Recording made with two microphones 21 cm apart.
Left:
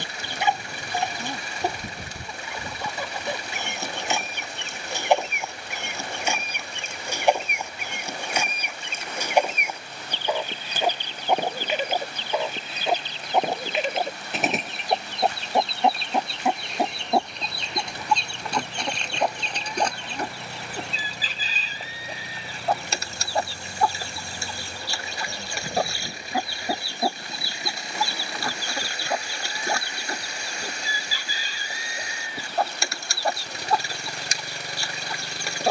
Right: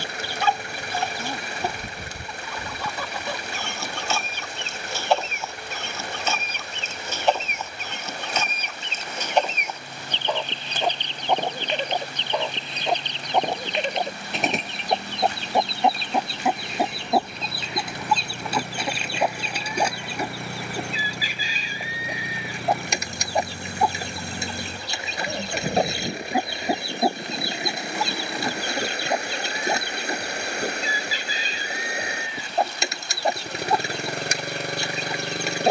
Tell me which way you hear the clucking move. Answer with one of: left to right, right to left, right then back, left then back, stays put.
left to right.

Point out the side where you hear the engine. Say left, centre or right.
right.